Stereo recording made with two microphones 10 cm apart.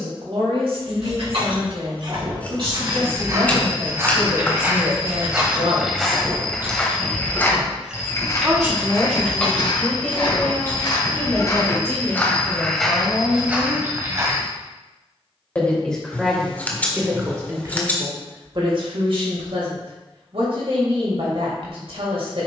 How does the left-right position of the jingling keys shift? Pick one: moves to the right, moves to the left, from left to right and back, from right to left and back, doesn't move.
moves to the left.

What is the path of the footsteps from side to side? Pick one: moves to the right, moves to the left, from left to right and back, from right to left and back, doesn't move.
from right to left and back.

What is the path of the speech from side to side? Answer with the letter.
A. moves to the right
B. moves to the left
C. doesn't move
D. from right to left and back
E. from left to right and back
D.